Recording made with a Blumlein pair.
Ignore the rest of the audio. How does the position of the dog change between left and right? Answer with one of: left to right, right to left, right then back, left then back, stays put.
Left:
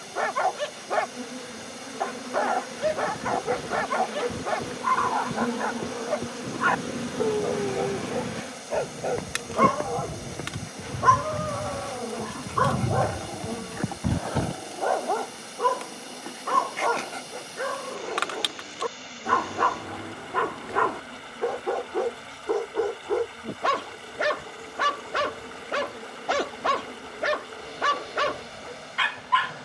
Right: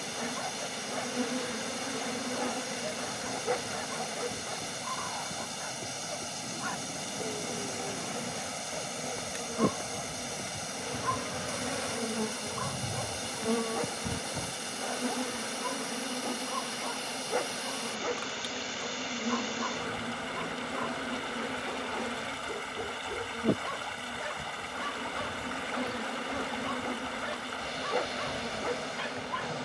stays put.